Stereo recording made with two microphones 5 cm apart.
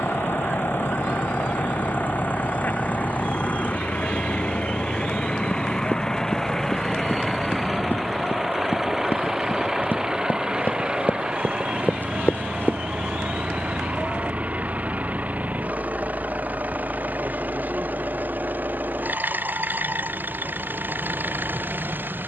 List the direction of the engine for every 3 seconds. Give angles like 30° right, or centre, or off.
50° left, 20° left, centre, 20° right, 30° right, 40° right, 50° right, 50° right.